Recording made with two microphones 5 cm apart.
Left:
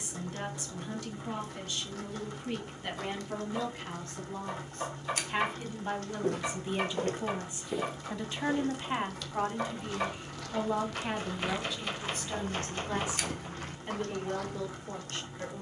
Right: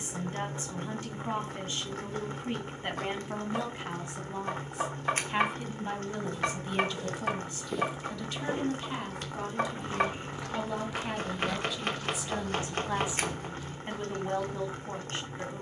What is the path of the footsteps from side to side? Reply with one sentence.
You can hear the footsteps move from left to right and back again.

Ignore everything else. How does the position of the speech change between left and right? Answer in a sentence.
In this clip you hear the speech move from right to left and back again.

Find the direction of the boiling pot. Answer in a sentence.
You can hear the boiling pot on the right.